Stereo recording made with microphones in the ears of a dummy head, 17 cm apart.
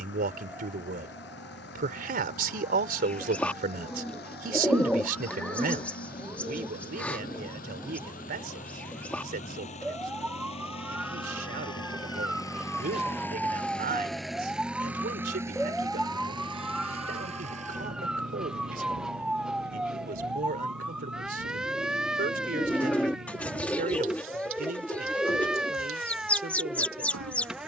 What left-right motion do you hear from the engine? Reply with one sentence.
You can hear the engine travel towards the right.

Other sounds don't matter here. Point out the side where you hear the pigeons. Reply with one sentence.
In this clip you hear the pigeons in the centre.